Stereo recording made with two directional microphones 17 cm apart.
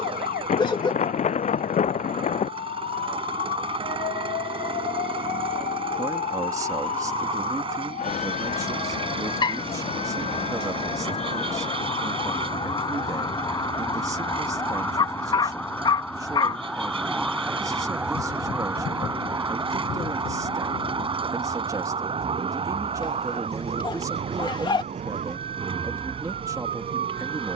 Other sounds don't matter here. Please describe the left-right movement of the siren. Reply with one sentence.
In this clip you hear the siren move to the right.